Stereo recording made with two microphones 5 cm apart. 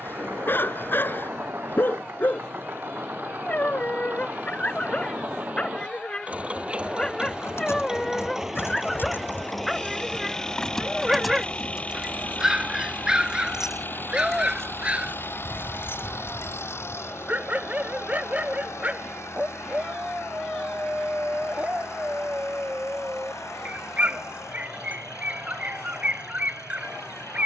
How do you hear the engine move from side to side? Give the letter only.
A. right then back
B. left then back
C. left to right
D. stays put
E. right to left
E.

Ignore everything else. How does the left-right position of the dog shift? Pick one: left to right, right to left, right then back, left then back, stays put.
left to right.